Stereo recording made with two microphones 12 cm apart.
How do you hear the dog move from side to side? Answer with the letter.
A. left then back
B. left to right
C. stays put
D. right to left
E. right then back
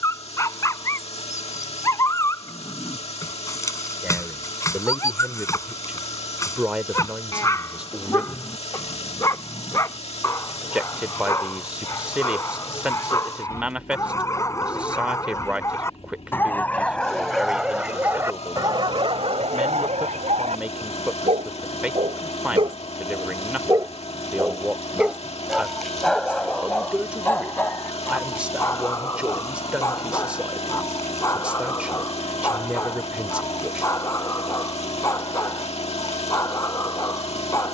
E.